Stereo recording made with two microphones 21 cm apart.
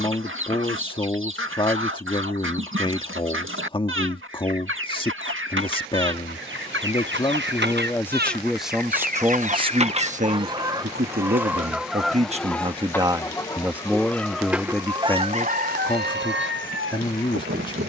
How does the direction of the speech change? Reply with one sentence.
You can hear the speech go right and come back.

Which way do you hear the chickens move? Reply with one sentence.
In this clip you hear the chickens go left and come back.